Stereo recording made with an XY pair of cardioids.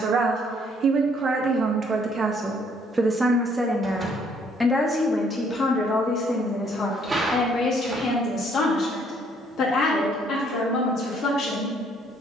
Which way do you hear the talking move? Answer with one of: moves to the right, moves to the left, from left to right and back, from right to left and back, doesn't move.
moves to the left.